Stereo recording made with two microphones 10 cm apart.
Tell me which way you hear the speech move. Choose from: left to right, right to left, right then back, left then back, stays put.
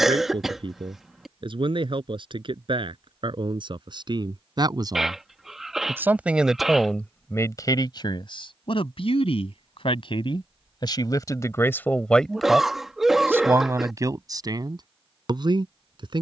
left then back.